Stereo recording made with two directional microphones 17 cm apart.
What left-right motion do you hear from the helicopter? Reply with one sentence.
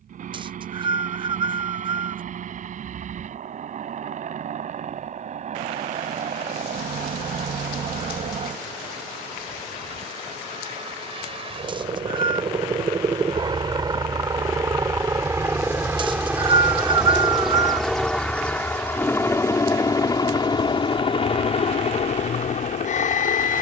In this clip you hear the helicopter travel towards the left.